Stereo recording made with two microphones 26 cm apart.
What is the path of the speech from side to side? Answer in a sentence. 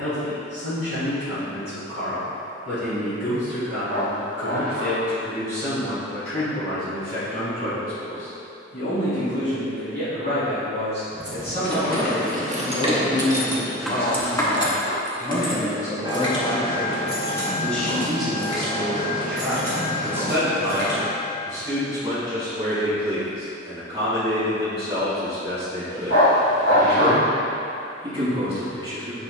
You can hear the speech travel towards the right.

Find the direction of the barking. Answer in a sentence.
In this clip you hear the barking on the left.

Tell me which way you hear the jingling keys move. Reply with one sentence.
You can hear the jingling keys go from the right side to the left.